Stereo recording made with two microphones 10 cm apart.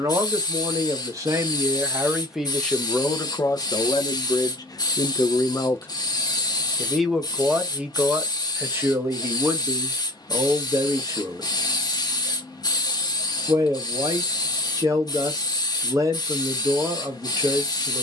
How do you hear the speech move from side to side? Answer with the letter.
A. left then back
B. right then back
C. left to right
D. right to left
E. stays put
A.